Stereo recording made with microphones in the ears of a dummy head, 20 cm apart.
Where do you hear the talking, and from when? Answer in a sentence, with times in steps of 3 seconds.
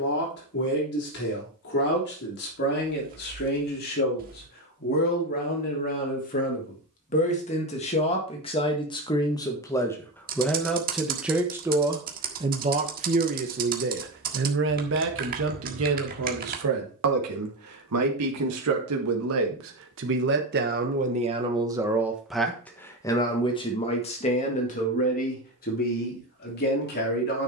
You can hear the talking on the left from 0 s, in the centre from 9 s, on the right from 12 s, in the centre from 21 s and on the left from 24 s.